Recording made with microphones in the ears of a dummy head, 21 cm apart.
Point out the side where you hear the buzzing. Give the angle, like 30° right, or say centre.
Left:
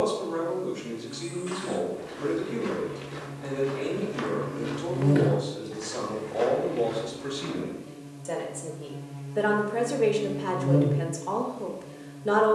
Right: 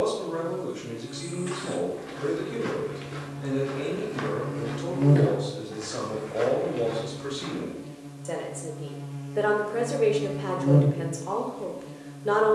80° right.